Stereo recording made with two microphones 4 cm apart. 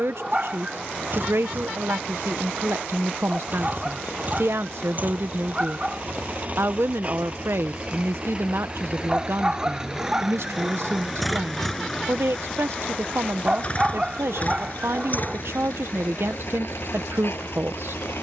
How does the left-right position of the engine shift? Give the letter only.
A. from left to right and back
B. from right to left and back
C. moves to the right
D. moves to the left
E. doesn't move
D.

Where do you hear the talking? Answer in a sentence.
You can hear the talking on the right.